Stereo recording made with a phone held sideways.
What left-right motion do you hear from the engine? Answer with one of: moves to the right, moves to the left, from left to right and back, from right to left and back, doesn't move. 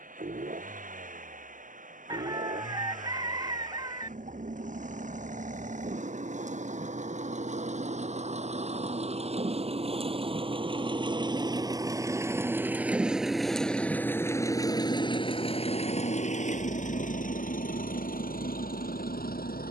moves to the left.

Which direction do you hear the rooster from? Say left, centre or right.
right.